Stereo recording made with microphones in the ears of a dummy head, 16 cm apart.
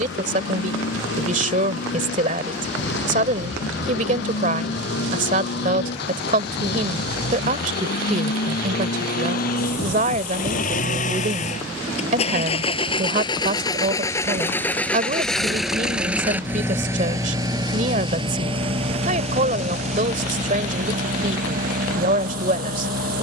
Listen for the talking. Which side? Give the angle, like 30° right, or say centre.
50° right.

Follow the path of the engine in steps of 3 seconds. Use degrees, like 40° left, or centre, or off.
80° left, 70° left, 60° left, 50° left, 20° left, 10° right, 40° right, 50° right.